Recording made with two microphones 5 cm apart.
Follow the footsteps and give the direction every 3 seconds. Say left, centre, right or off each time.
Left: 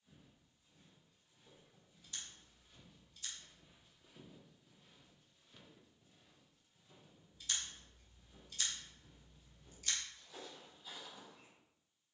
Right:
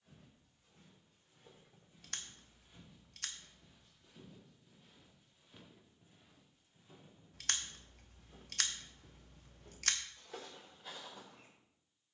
right, centre, right, right.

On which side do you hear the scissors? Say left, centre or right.
right.